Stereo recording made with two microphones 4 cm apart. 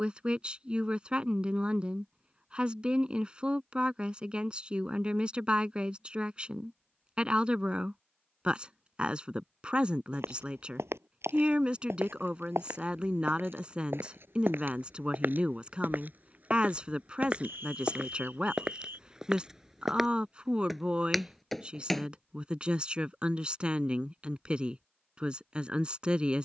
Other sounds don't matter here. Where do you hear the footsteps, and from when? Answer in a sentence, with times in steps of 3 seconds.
In this clip you hear the footsteps not at all from 0 s, on the right from 9 s, in the centre from 18 s and not at all from 24 s.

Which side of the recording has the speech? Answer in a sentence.
In this clip you hear the speech on the right.